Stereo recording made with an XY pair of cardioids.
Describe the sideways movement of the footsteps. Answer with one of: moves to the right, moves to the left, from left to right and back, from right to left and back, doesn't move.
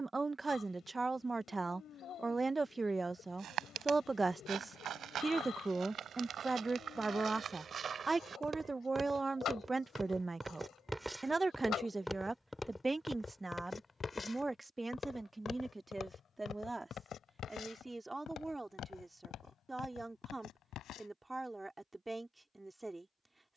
moves to the left.